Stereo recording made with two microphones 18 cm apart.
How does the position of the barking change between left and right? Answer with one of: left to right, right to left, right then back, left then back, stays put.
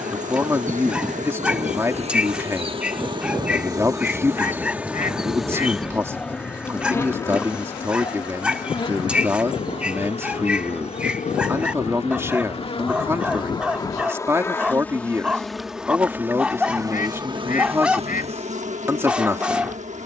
stays put.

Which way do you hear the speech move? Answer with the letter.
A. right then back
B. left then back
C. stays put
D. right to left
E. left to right
C.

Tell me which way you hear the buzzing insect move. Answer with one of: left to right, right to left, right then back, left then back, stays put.
left then back.